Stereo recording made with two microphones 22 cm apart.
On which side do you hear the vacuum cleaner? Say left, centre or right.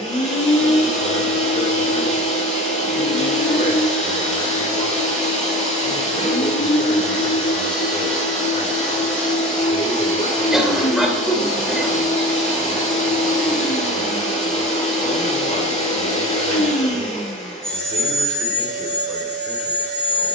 left.